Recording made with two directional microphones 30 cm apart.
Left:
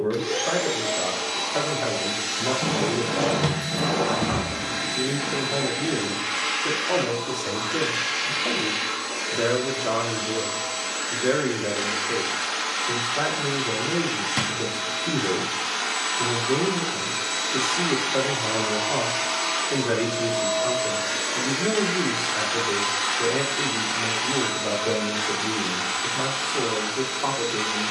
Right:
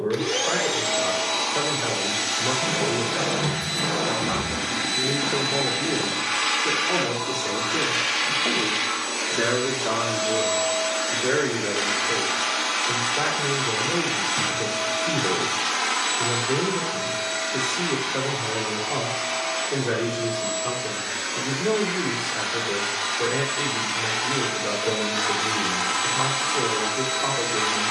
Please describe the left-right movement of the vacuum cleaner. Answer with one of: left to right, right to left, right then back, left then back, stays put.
left then back.